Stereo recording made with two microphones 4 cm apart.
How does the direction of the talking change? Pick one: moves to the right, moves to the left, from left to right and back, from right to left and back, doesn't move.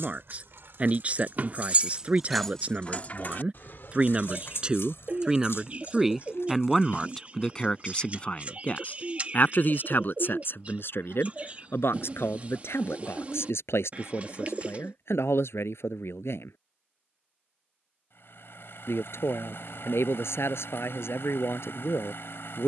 moves to the left.